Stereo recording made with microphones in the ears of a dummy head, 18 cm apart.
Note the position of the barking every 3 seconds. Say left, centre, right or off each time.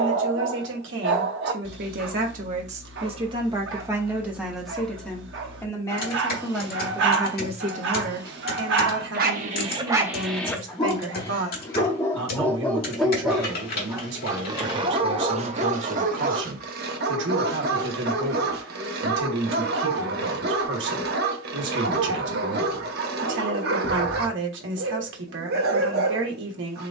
right, right, right, centre, centre, right, right, right, right.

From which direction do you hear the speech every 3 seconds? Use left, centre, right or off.
right, centre, right, right, right, right, right, right, right.